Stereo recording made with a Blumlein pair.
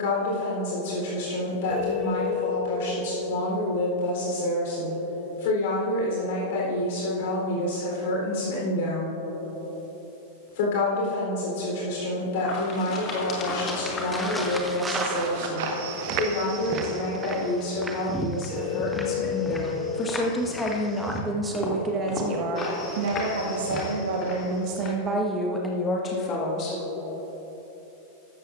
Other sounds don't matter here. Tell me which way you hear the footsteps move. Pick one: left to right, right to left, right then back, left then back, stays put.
right then back.